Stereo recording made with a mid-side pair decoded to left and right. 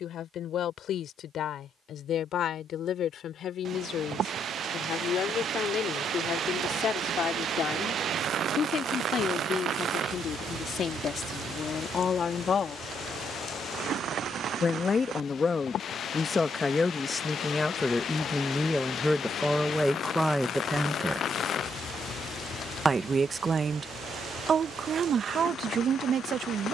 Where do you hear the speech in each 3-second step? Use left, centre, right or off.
left, left, left, left, left, left, centre, right, right.